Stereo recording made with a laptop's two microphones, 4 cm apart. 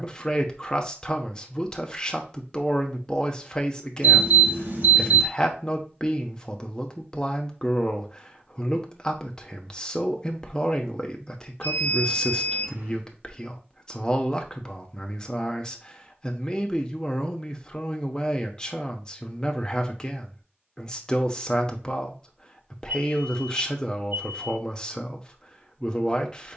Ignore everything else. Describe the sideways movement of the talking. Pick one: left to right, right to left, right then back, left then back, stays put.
stays put.